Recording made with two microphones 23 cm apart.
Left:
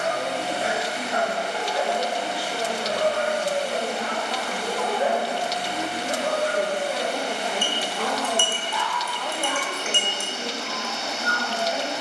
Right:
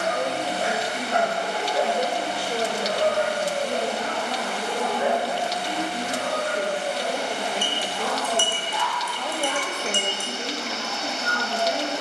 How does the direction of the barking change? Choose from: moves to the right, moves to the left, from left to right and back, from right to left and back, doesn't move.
from right to left and back.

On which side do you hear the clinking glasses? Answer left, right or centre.
right.